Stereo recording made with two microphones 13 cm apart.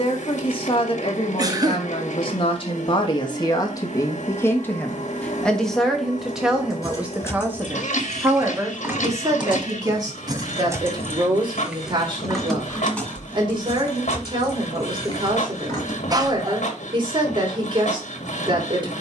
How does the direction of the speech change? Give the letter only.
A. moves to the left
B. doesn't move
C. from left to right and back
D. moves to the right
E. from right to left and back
D.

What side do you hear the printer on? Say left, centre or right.
left.